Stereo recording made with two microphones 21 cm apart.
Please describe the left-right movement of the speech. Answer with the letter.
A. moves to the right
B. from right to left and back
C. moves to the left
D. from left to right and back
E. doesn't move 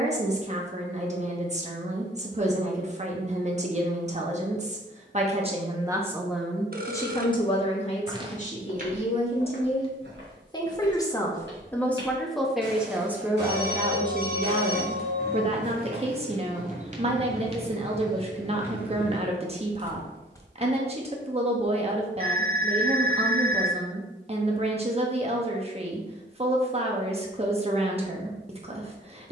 B.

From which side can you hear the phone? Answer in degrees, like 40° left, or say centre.
50° right.